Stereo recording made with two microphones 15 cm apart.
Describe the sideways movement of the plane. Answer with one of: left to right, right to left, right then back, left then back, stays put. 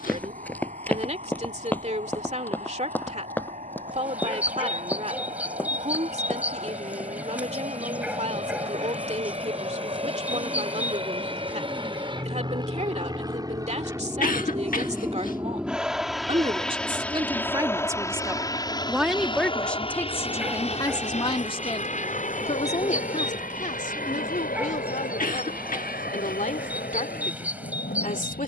right to left.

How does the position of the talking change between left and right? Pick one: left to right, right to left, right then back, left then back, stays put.
right to left.